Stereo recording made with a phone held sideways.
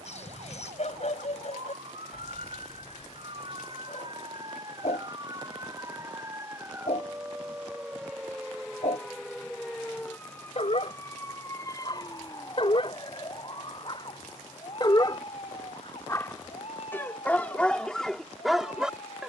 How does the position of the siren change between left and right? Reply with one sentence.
In this clip you hear the siren move from right to left.